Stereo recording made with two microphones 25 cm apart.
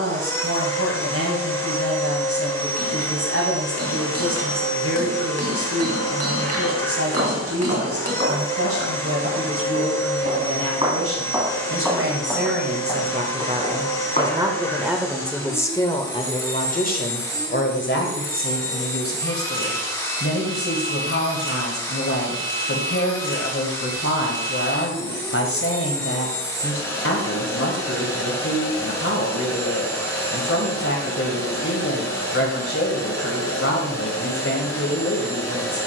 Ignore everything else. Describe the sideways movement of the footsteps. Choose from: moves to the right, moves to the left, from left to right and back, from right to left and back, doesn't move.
moves to the left.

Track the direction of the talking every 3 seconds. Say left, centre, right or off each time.
right, right, right, right, right, left, left, left, left, left, left, left.